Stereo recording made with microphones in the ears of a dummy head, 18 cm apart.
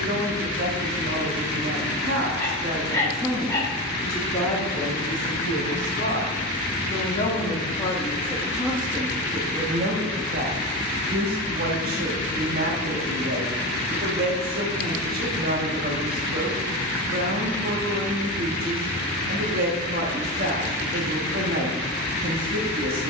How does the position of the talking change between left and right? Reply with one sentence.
You can hear the talking go left and come back.